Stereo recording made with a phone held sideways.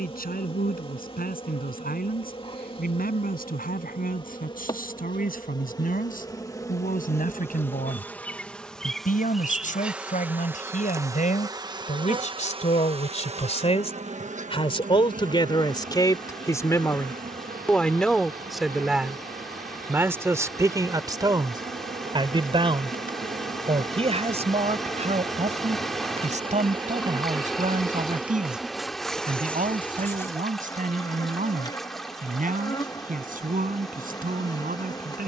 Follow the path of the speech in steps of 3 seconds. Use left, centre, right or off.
left, left, left, left, left, left, centre, right, right, right, right, right.